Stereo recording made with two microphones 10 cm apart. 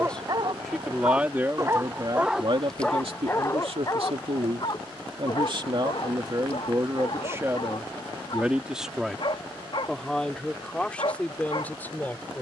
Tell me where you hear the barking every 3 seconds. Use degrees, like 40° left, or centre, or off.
20° right, 40° left, 60° left, 60° left.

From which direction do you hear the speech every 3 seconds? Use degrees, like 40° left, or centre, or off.
30° right, 70° right, 30° right, 10° left.